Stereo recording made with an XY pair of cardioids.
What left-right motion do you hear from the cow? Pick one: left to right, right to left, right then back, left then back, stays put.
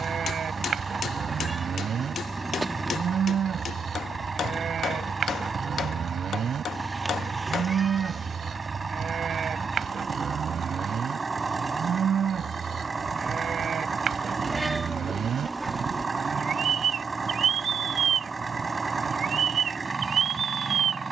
stays put.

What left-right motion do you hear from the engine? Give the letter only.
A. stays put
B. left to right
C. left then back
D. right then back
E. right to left
A.